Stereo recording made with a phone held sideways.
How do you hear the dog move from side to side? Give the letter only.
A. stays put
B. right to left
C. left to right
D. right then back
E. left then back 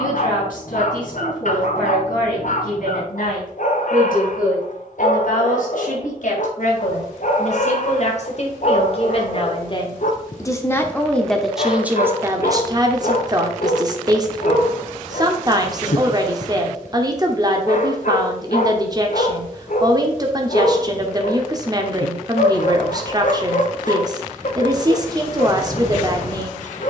A.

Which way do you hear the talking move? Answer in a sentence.
You can hear the talking move from left to right.